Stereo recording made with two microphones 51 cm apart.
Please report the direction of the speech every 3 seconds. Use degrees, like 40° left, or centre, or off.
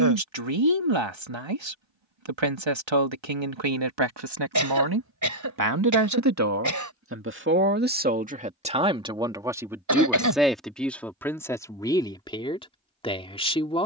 60° right, 50° right, 20° right, centre, 10° left.